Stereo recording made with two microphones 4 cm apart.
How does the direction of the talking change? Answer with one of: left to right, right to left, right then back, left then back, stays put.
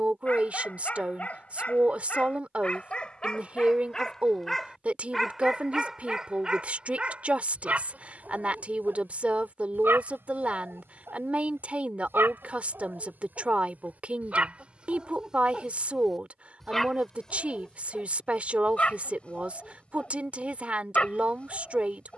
stays put.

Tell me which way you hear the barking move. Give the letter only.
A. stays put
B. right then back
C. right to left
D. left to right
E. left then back
B.